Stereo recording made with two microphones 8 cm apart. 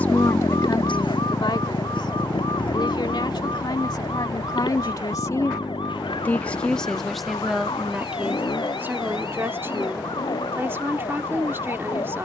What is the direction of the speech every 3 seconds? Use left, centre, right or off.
left, left, centre, right.